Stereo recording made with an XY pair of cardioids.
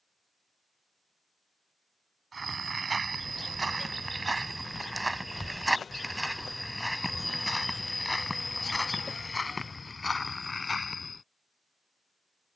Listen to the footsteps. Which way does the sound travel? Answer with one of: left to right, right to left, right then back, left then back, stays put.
right to left.